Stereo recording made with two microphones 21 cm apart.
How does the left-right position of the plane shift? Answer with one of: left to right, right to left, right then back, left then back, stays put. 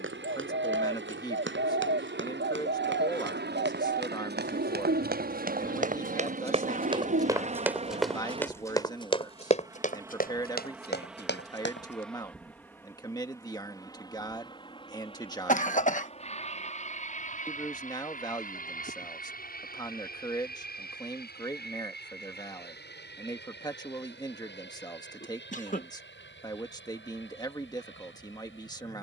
right to left.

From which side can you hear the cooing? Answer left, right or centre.
right.